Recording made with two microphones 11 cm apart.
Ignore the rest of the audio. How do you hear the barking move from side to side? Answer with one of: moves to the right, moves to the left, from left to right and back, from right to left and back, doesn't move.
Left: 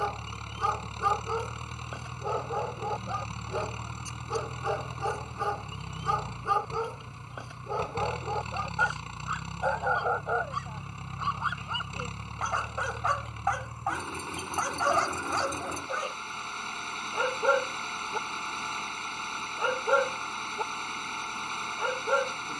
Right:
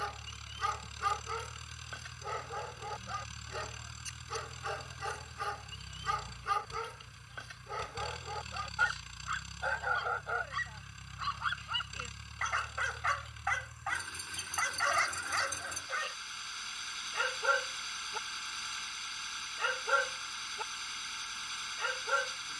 doesn't move.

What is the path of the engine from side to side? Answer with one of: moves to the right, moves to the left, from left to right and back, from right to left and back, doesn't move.
doesn't move.